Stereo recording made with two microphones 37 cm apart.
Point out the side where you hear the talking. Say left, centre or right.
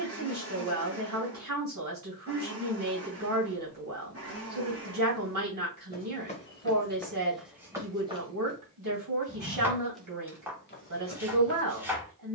right.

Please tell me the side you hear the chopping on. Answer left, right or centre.
centre.